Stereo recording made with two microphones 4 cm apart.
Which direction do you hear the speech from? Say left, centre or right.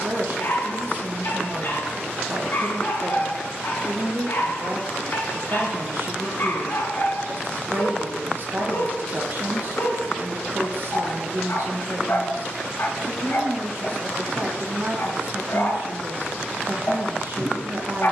right.